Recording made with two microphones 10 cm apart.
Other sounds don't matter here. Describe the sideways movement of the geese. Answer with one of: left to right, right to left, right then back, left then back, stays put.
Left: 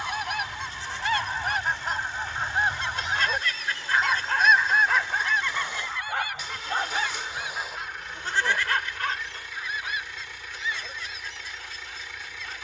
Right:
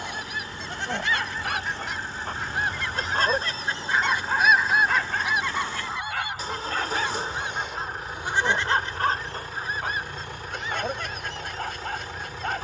left to right.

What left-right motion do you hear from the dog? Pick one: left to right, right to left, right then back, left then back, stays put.
left then back.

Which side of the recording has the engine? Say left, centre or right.
right.